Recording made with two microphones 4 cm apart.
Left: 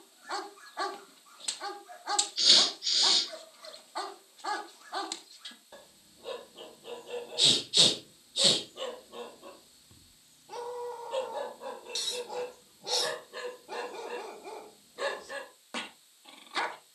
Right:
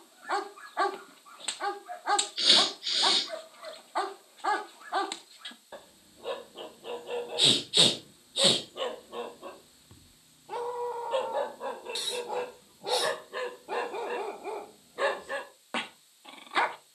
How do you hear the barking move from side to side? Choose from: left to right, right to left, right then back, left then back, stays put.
stays put.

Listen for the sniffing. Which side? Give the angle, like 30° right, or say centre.
20° right.